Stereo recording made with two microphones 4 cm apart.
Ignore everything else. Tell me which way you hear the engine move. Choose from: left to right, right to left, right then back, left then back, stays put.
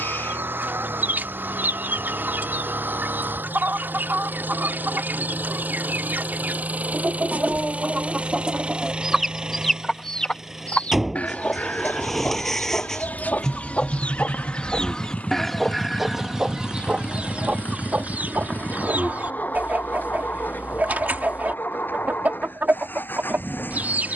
right to left.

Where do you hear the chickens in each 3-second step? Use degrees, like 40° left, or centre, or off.
60° right, 60° right, 40° right, 20° left, 40° left, 20° right, 50° right, 50° right.